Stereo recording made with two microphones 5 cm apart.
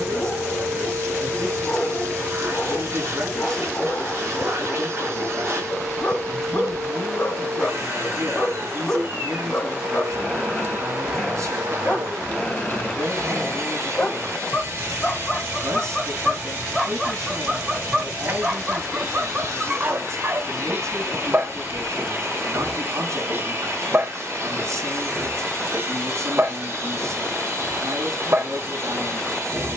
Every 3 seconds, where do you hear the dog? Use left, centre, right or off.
left, left, left, left, left, centre, right, right, right, right.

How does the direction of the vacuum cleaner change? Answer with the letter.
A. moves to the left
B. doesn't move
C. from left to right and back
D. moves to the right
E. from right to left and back
B.